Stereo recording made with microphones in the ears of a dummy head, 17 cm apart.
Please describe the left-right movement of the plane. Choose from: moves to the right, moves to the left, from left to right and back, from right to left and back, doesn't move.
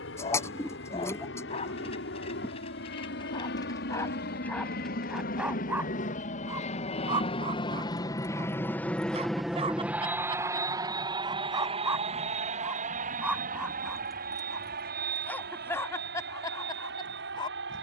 moves to the right.